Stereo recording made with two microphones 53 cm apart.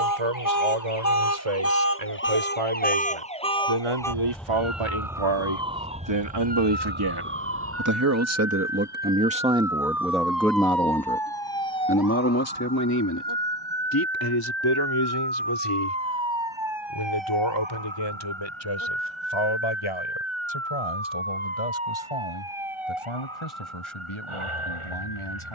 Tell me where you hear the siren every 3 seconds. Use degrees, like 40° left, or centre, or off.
30° left, centre, 20° right, 40° right, 50° right, 50° right, 60° right, 60° right, 60° right.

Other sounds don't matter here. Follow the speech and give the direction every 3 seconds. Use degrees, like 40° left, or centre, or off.
80° right, 60° right, 40° right, centre, 40° left, 50° left, 60° left, 60° left, 60° left.